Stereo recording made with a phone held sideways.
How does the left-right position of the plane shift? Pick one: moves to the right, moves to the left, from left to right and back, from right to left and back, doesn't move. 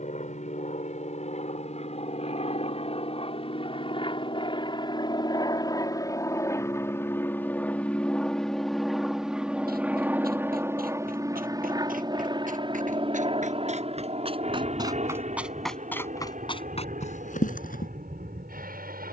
moves to the right.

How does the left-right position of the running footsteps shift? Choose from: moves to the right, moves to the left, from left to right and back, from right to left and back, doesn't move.
moves to the left.